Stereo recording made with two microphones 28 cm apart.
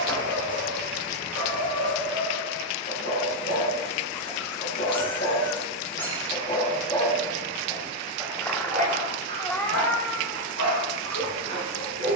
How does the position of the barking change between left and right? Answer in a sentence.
You can hear the barking move from left to right.